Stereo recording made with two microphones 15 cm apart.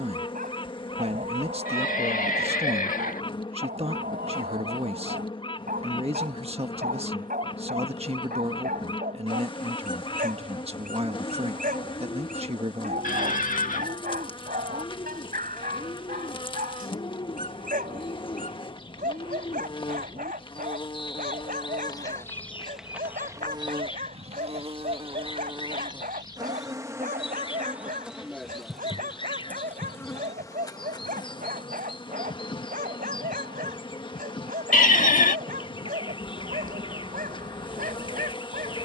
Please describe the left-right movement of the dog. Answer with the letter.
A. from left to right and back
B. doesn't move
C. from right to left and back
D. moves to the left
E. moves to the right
B.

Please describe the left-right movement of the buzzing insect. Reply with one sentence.
In this clip you hear the buzzing insect move from left to right and back again.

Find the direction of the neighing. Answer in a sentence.
You can hear the neighing on the left.